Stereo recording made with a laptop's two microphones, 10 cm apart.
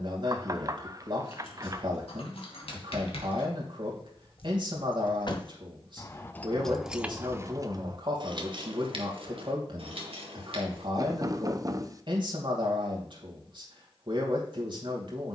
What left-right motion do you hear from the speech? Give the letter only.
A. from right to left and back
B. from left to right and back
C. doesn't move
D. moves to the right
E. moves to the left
C.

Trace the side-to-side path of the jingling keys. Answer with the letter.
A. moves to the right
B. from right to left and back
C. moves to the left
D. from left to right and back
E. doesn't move
A.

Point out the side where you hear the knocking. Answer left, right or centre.
right.